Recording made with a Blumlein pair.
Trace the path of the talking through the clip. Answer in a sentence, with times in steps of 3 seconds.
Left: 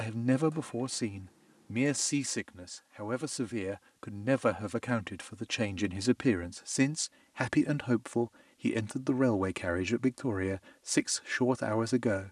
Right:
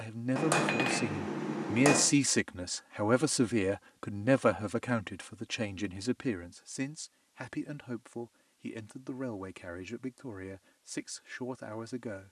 You can hear the talking in the centre from 0 s and on the left from 6 s.